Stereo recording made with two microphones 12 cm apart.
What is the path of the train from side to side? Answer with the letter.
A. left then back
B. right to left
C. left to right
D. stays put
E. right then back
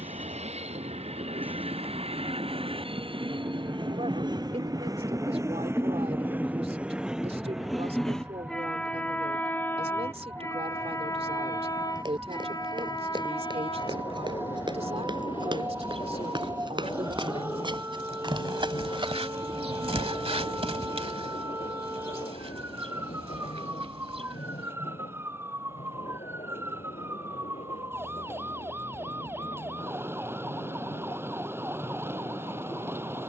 B.